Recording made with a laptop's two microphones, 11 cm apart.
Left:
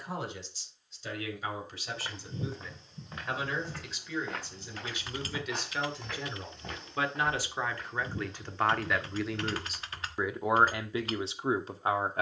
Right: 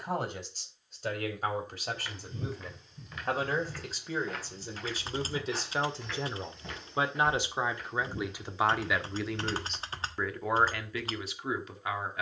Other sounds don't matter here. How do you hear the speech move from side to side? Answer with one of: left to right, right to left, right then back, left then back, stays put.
right to left.